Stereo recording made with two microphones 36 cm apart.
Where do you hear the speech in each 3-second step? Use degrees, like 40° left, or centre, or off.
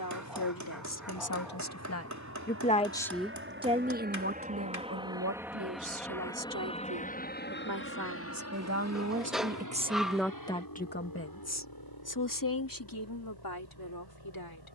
50° left, 30° right, 50° right, centre, 70° left.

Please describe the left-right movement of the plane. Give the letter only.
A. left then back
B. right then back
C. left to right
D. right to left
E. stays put
D.